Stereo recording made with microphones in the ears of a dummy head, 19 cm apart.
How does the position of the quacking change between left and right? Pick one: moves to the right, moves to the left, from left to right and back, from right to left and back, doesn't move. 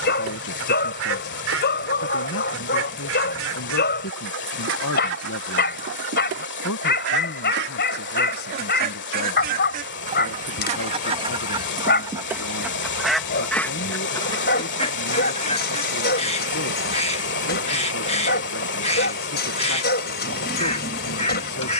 moves to the left.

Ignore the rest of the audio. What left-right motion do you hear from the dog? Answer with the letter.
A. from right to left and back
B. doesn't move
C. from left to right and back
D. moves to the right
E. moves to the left
B.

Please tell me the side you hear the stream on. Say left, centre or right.
left.